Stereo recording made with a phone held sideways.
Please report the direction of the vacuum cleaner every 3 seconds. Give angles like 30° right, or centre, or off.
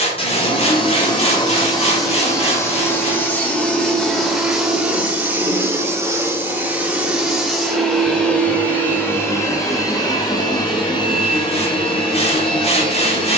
30° left, centre, centre, 30° left, 30° left.